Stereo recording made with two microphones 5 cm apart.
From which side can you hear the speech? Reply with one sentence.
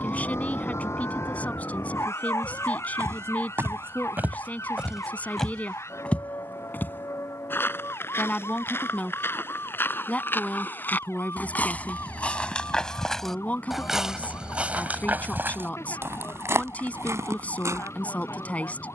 In this clip you hear the speech on the left.